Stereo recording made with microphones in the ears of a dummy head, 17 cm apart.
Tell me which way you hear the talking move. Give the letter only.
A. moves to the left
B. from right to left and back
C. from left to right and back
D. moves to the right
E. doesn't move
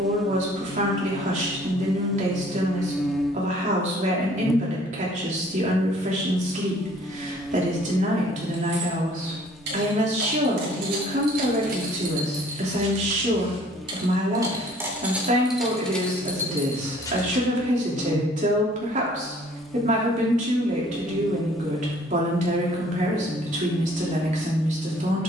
E.